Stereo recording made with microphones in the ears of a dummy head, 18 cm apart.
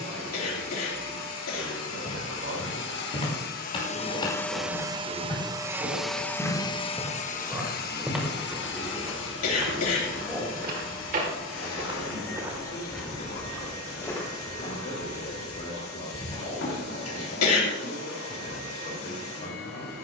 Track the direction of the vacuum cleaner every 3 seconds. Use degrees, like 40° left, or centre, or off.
70° left, 10° left, 40° left, 70° left, 80° left, 80° left, 80° left.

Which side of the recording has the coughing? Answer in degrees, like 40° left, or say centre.
80° left.